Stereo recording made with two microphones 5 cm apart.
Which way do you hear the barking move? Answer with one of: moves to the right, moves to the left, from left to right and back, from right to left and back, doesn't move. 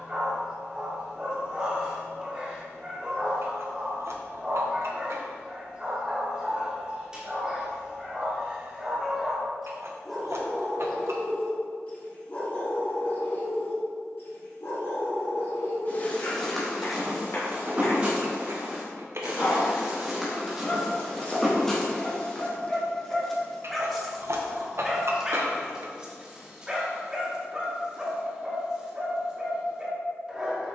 from right to left and back.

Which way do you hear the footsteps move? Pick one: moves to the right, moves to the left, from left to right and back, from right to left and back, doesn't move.
from left to right and back.